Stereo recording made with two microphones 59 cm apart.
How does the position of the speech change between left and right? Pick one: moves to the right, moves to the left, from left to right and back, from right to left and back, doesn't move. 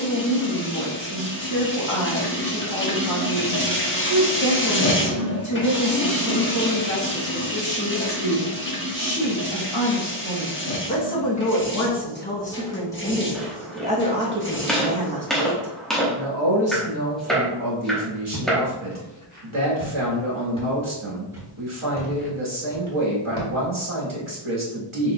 moves to the right.